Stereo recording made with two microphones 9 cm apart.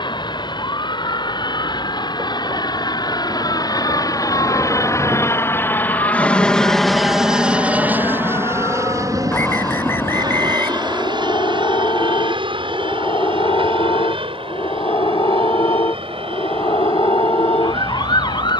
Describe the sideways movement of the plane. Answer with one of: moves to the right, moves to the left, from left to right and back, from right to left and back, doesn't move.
moves to the right.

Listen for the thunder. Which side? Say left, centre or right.
right.